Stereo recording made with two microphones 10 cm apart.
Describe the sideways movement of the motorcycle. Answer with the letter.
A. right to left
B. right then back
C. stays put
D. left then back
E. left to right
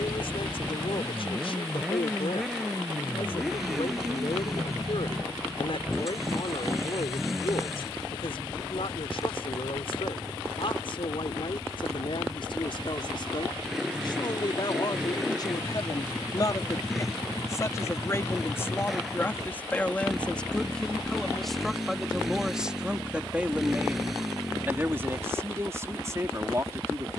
C.